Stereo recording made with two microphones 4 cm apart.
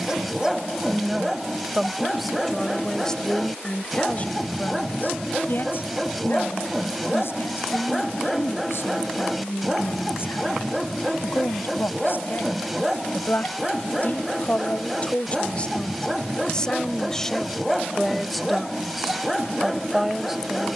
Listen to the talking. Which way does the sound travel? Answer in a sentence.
You can hear the talking move from right to left and back again.